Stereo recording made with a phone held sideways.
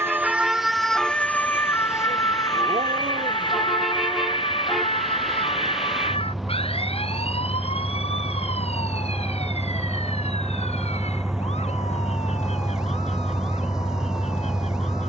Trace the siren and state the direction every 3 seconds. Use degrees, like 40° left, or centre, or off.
10° left, 40° left, 50° left, 50° left, 50° left.